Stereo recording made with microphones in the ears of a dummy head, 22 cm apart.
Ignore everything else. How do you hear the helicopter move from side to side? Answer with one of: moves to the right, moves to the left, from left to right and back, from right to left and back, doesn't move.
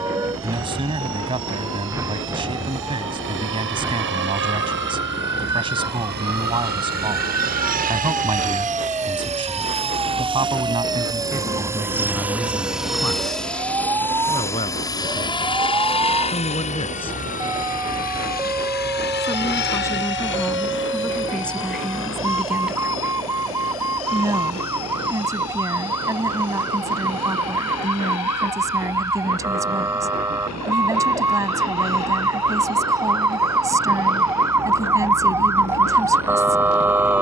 moves to the left.